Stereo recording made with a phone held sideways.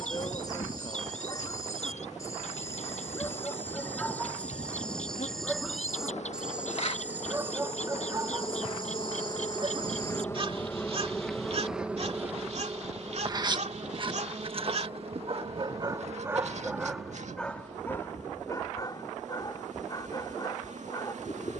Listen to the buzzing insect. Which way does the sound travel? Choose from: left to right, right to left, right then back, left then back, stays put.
left to right.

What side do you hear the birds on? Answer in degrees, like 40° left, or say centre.
60° left.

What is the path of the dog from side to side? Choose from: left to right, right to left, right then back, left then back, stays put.
right then back.